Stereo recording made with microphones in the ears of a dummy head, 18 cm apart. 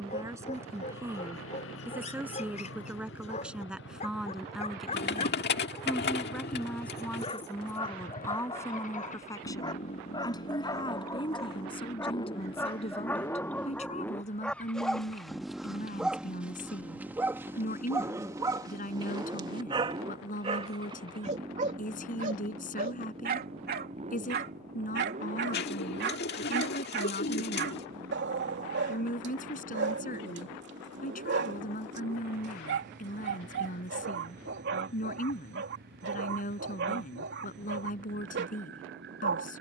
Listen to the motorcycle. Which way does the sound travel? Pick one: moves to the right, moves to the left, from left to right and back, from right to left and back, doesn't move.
moves to the right.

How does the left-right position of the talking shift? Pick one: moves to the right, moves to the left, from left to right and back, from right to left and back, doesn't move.
moves to the left.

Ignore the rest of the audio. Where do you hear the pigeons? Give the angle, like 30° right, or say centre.
50° left.